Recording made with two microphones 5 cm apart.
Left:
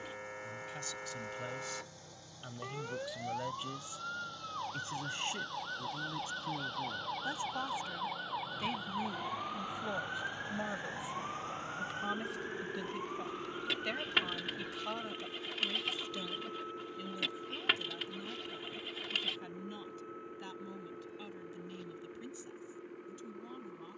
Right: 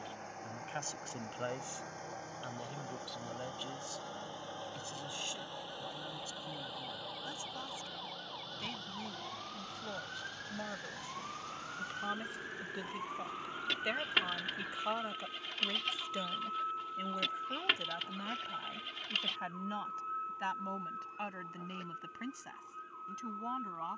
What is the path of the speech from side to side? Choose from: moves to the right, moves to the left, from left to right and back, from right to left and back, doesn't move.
from right to left and back.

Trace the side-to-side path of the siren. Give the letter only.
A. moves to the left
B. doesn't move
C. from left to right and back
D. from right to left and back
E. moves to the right
E.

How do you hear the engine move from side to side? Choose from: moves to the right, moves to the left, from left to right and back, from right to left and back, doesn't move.
moves to the left.